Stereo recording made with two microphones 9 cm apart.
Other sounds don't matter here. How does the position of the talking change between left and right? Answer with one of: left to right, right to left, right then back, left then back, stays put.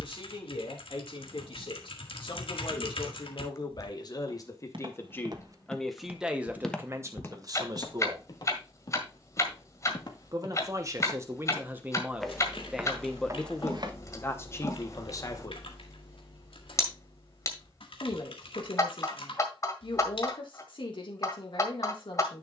right then back.